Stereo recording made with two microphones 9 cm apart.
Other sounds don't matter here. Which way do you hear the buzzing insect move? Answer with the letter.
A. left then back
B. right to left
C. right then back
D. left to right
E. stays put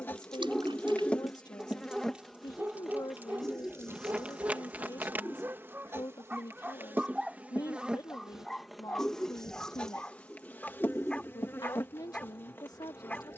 C.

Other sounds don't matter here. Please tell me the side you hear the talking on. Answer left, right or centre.
left.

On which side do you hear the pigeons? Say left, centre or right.
centre.